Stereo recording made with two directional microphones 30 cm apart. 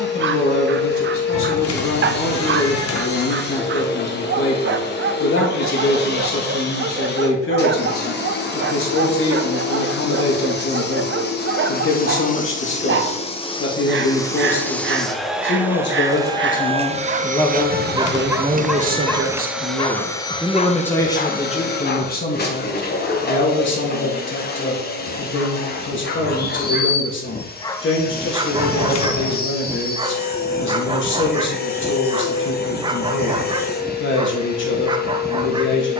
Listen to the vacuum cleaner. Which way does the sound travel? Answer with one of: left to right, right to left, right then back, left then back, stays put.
right then back.